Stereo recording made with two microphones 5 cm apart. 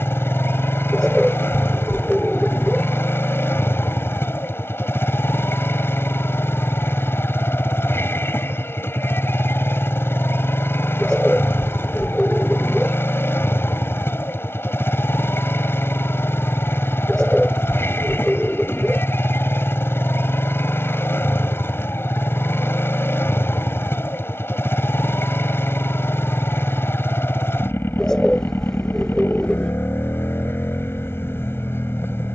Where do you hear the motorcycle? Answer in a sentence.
You can hear the motorcycle on the left.